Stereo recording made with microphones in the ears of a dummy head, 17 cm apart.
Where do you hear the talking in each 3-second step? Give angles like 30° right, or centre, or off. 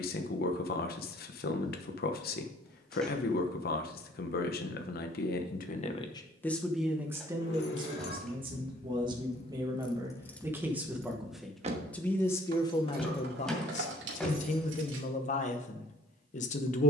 50° left, 50° left, 10° right, 10° right, 30° left, 40° left.